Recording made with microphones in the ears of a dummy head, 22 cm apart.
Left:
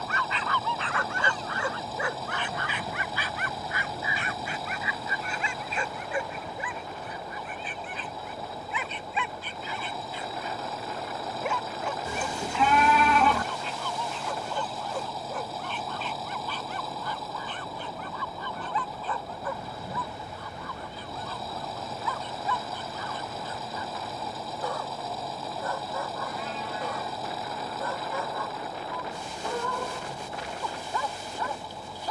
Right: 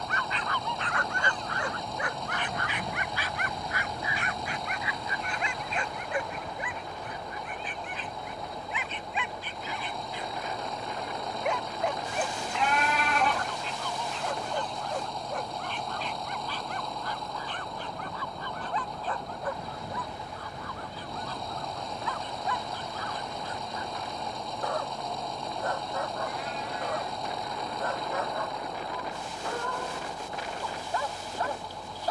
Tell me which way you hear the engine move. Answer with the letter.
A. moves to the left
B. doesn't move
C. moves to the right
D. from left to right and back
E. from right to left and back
B.